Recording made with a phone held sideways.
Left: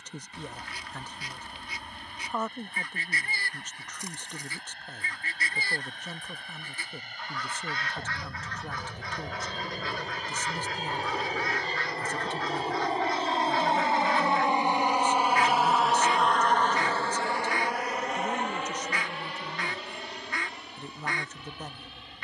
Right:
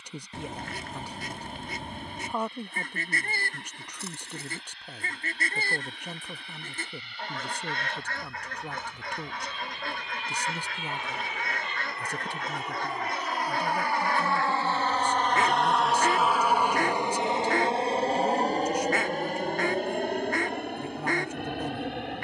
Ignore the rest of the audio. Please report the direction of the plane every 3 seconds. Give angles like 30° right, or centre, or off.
60° left, 60° left, 60° left, 50° left, 30° left, 10° right, 50° right, 60° right.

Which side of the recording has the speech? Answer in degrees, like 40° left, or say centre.
10° right.